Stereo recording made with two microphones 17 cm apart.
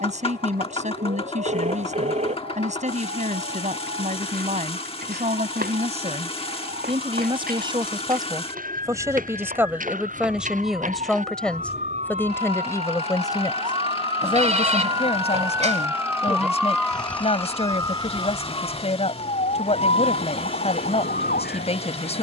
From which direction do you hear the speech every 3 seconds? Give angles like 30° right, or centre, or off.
40° right, 40° right, 30° right, 10° right, 20° left, 40° left, 40° left, 40° left.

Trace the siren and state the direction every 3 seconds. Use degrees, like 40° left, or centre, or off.
70° right, 60° right, 60° right, 50° right, 40° right, centre, 40° left, 60° left.